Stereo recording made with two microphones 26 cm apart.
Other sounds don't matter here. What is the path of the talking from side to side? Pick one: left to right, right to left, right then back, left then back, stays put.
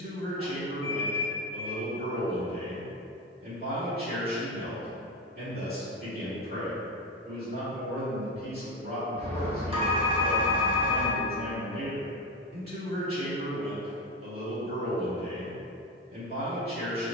stays put.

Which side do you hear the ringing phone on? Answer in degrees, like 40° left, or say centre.
20° right.